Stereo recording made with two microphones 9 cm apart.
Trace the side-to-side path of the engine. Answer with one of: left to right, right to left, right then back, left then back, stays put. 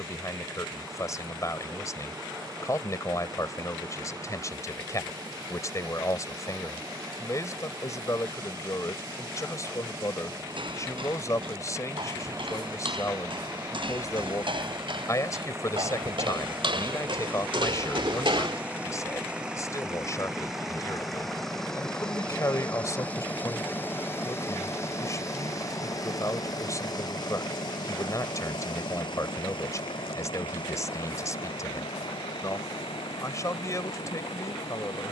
right to left.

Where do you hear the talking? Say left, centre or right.
left.